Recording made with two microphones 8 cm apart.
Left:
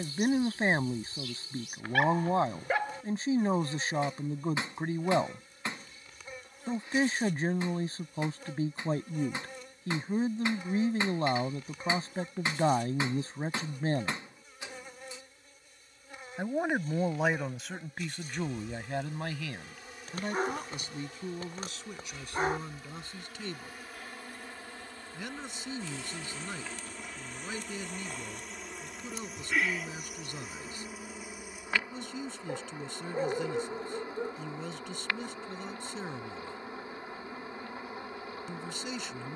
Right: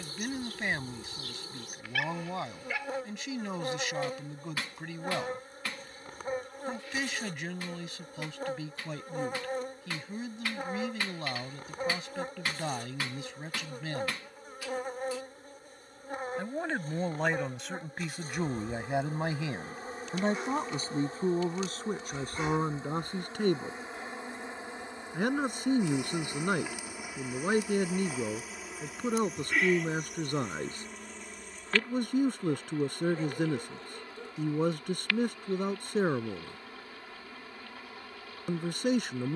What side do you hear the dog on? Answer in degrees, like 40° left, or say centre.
40° left.